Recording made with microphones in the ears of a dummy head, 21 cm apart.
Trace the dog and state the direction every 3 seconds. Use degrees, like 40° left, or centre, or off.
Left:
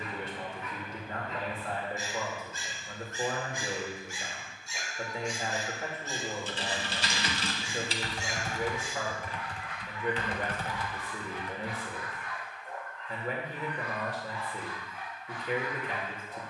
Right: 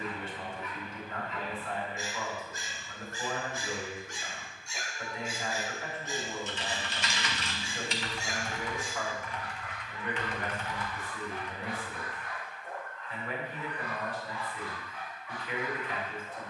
40° left, centre, 30° right, 50° right, 50° right, 60° right.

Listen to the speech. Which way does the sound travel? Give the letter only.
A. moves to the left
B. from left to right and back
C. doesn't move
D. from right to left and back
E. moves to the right
C.